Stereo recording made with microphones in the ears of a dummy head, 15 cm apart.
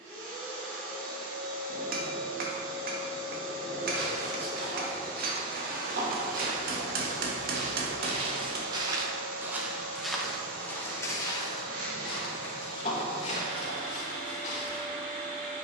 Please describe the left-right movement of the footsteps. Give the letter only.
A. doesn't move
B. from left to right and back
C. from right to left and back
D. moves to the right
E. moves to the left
E.